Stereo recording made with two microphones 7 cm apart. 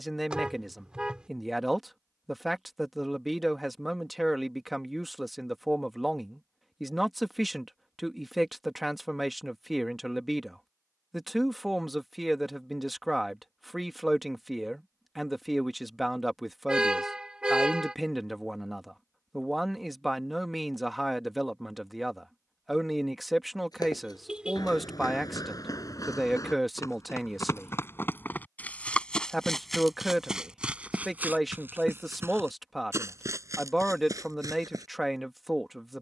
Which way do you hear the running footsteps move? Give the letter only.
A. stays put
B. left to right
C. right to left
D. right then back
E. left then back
B.